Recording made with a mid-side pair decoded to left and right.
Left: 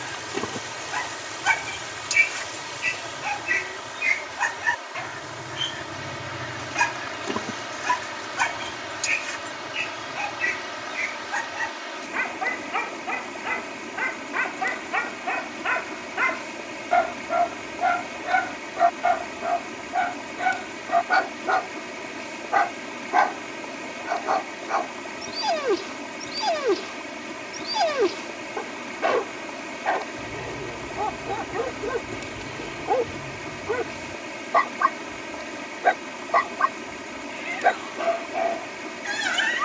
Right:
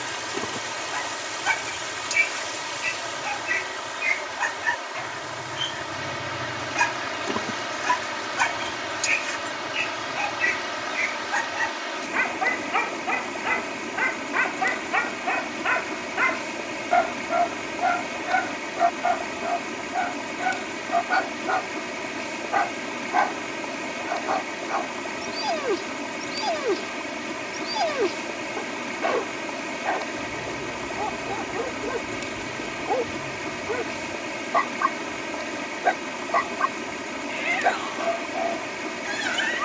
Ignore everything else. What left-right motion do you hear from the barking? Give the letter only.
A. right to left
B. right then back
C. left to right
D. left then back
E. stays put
B.